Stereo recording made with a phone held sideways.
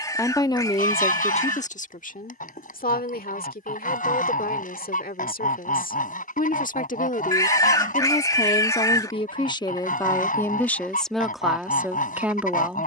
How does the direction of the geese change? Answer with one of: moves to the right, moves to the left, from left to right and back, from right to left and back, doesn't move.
doesn't move.